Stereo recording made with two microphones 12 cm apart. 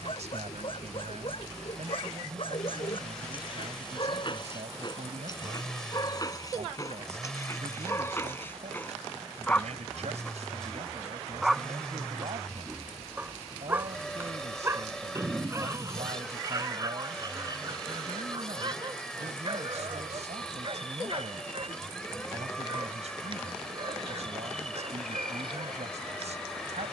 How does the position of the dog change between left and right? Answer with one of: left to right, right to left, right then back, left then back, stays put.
left to right.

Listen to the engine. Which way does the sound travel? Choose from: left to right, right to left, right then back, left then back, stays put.
stays put.